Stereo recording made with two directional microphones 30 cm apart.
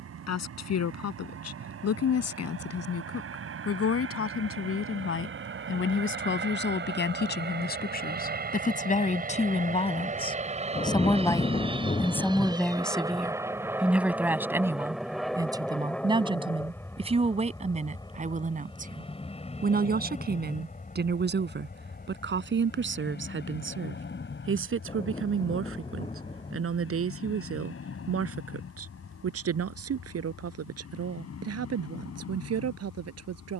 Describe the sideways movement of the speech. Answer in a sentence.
You can hear the speech move to the right.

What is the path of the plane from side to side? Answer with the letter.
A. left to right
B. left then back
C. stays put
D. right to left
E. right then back
D.